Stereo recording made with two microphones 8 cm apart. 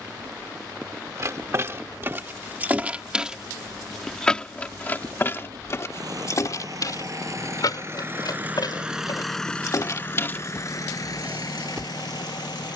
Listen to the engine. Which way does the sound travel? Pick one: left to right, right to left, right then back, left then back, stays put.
right to left.